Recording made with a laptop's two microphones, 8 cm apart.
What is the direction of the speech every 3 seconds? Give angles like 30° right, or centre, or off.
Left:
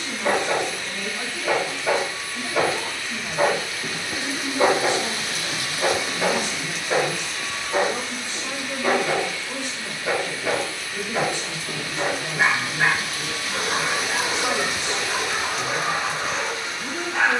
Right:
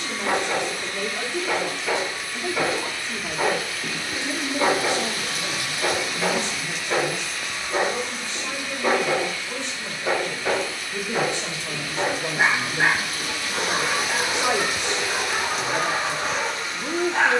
60° right, 40° right, 20° left, 10° right, 50° right, 60° right.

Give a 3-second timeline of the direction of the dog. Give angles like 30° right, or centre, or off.
50° left, 40° left, 10° left, 20° right, 30° right, 30° right.